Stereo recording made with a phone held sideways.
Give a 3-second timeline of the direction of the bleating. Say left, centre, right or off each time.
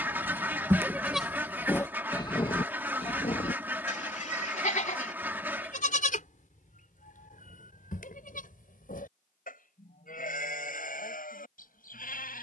centre, left, left, left.